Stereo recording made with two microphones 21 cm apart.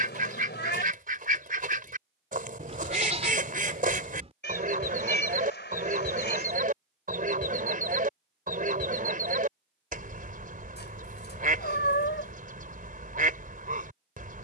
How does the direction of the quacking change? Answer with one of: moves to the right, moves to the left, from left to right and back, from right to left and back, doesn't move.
doesn't move.